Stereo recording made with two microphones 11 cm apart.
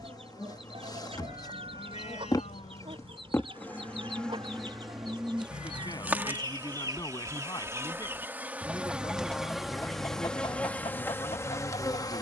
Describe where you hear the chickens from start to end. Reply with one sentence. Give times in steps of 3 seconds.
You can hear the chickens on the right from 0 s and on the left from 9 s.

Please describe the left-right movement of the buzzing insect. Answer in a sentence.
In this clip you hear the buzzing insect move from left to right and back again.